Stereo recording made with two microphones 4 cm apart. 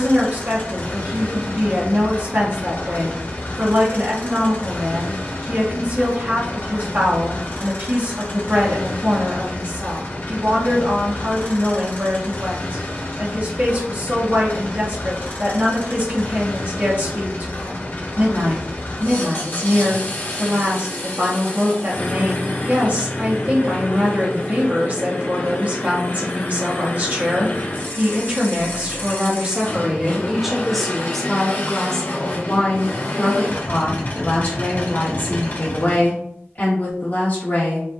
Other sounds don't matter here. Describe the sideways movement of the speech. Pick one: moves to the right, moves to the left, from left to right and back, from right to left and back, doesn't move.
moves to the left.